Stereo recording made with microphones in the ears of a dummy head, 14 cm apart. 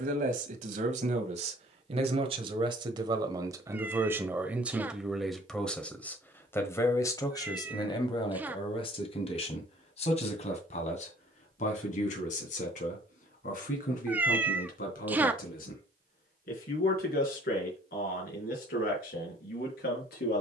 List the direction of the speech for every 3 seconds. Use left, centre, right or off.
right, centre, left, left, left, left, left.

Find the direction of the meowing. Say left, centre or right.
centre.